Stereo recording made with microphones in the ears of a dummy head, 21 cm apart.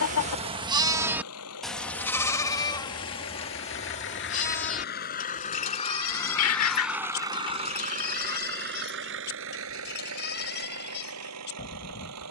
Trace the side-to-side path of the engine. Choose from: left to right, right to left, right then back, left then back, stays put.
left to right.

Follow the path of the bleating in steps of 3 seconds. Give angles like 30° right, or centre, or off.
centre, 30° left, 40° left, 50° left.